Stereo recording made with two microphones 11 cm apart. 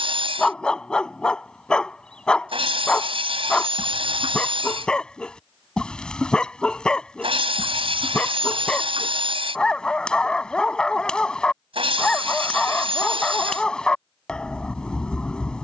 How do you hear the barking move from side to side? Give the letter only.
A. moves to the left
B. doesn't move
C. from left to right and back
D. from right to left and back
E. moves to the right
B.